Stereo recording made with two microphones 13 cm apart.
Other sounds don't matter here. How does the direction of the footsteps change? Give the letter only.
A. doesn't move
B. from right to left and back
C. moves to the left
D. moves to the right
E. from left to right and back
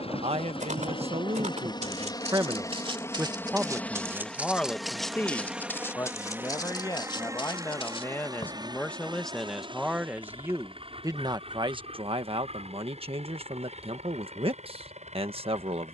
C.